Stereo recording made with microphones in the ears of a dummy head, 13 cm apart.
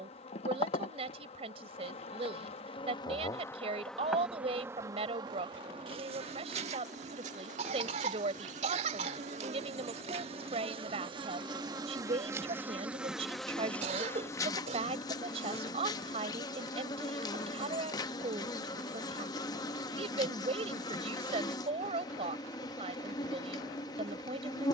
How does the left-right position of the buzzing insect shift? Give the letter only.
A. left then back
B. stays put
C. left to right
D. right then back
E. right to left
D.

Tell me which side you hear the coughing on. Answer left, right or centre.
right.